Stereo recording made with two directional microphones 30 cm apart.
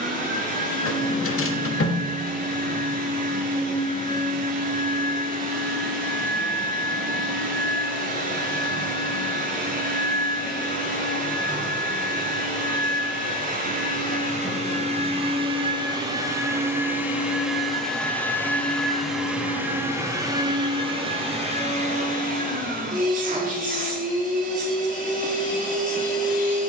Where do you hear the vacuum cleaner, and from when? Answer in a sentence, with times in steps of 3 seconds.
In this clip you hear the vacuum cleaner on the right from 0 s, in the centre from 15 s and on the right from 21 s.